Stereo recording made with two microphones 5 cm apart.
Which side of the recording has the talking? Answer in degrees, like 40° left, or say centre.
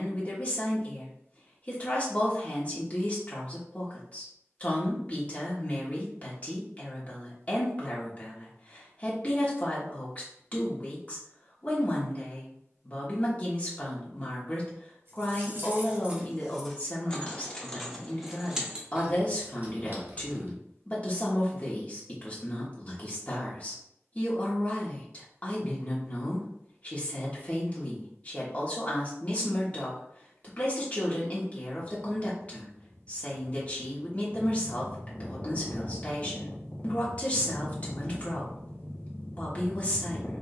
30° left.